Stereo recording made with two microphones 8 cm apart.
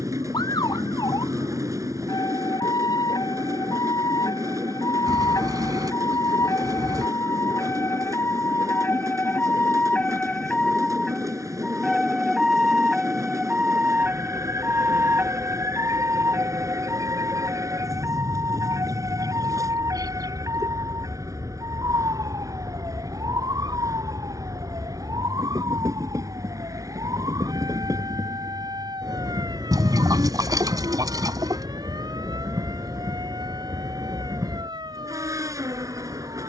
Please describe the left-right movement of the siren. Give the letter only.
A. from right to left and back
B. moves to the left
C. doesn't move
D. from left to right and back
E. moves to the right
E.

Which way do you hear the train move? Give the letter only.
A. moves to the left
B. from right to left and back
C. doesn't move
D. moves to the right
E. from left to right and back
C.